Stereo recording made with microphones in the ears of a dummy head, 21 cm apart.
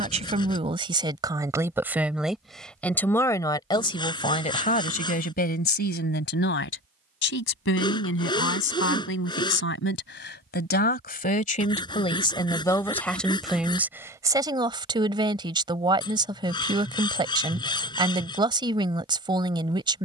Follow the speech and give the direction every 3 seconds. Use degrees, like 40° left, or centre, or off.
20° right, 30° left, 60° left, 50° left, centre, 20° right, 20° right.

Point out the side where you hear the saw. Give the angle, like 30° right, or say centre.
20° left.